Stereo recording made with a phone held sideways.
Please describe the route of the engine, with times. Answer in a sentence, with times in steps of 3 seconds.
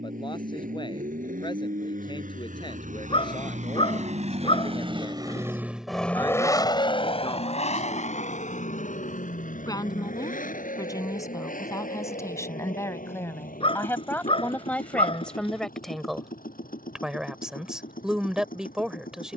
You can hear the engine on the right from 0 s and on the left from 6 s.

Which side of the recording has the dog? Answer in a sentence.
You can hear the dog on the left.